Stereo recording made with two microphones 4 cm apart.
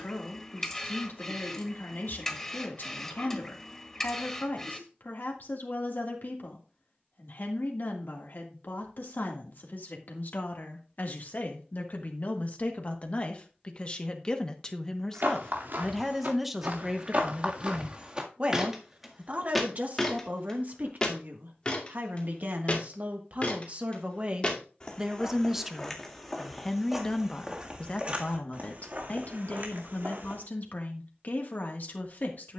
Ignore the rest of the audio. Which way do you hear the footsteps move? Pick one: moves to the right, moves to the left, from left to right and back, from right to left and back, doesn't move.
from right to left and back.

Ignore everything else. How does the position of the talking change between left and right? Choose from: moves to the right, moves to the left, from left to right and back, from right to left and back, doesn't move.
from left to right and back.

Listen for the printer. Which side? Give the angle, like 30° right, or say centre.
10° left.